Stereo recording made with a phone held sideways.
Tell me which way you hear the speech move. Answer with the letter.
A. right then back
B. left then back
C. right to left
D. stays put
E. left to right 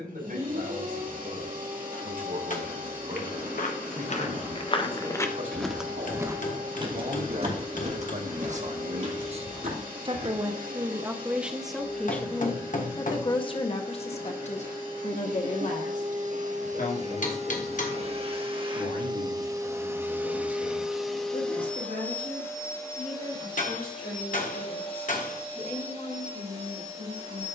C.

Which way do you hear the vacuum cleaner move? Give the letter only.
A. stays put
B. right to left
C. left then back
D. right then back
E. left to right
B.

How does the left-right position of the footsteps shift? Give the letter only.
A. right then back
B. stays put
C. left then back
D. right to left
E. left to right
E.